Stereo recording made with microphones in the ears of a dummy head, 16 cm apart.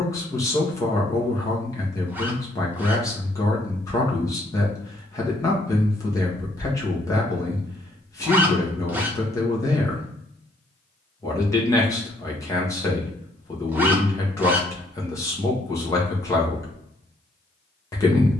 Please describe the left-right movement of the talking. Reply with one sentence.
In this clip you hear the talking stay put.